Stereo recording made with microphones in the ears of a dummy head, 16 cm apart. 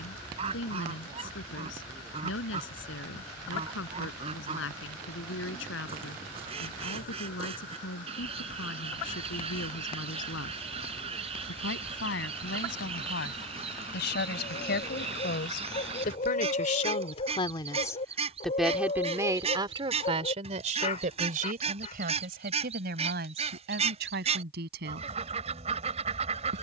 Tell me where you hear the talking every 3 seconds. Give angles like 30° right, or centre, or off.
80° left, 80° left, 80° left, 80° left, 70° left, 40° left, 20° right, 60° right, 70° right.